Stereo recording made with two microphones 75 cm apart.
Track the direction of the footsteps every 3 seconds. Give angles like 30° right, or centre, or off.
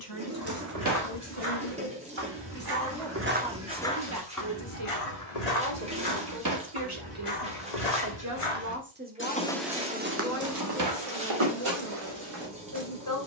40° right, 30° left, 60° left, 20° right, 50° right.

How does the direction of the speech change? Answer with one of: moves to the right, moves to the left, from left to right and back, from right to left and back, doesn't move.
from left to right and back.